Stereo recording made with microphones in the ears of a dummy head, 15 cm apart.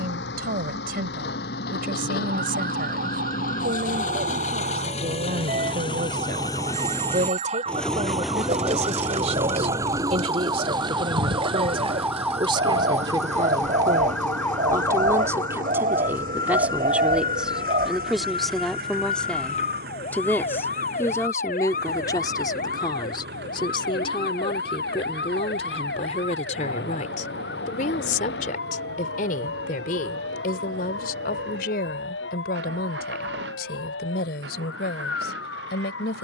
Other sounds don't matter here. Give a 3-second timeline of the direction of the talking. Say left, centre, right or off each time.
right, right, right, right, right, centre, centre, left, left, left, left, left.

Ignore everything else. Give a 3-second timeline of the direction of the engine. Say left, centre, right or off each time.
left, left, centre, right, right, right, right, right, right, right, right, right.